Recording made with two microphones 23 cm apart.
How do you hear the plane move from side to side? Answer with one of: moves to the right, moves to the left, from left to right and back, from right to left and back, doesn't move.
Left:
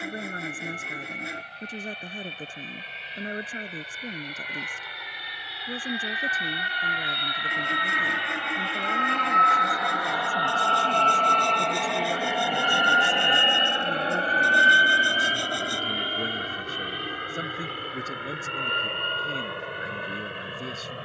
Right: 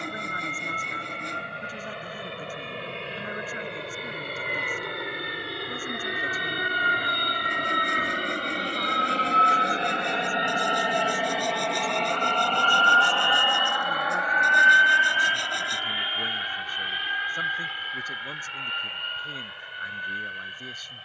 moves to the left.